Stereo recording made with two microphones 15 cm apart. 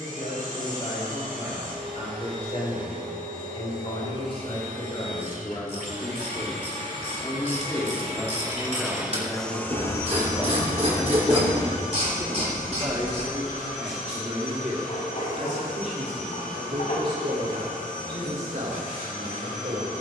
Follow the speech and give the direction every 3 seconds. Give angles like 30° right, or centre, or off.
50° left, 40° left, 20° left, centre, 40° right, 60° right, 70° right.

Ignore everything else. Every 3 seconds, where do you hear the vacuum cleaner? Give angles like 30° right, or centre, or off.
60° right, 60° right, 50° right, 30° left, 60° left, 70° left, 70° left.